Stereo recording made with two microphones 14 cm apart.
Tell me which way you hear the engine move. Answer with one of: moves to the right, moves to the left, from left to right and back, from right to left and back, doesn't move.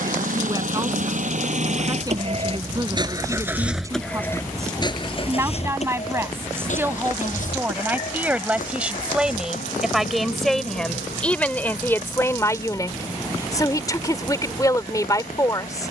moves to the left.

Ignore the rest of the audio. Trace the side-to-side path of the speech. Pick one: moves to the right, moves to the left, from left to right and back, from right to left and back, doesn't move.
moves to the left.